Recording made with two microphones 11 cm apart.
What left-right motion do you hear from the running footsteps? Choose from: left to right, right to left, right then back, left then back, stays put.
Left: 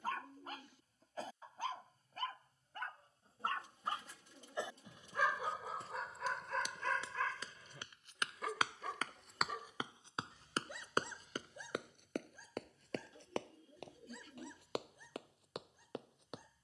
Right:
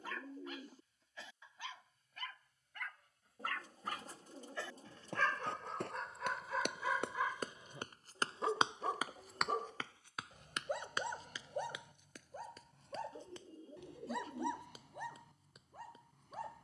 right to left.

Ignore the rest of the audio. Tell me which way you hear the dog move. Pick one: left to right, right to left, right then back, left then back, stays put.
left to right.